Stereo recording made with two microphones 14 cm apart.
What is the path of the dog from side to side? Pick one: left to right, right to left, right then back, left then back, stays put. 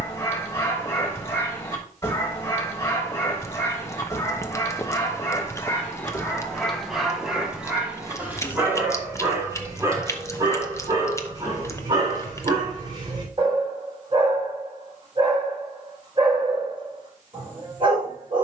left to right.